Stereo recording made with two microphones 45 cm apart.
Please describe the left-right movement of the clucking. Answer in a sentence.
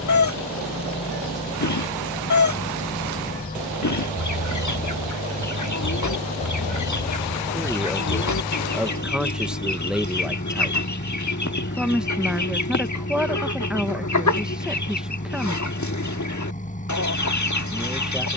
In this clip you hear the clucking stay put.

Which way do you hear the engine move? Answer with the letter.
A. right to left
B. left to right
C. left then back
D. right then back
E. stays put
E.